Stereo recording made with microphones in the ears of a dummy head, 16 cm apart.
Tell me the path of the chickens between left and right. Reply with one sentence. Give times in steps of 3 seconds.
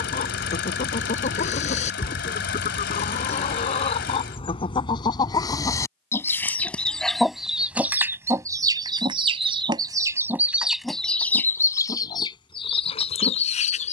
In this clip you hear the chickens on the left from 0 s, in the centre from 6 s and on the left from 12 s.